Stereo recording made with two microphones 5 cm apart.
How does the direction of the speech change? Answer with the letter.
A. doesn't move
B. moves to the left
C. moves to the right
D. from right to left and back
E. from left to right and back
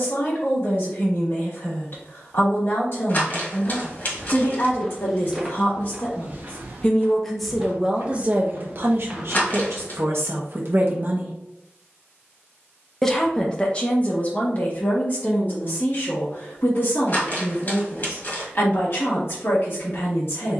E.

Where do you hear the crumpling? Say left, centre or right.
left.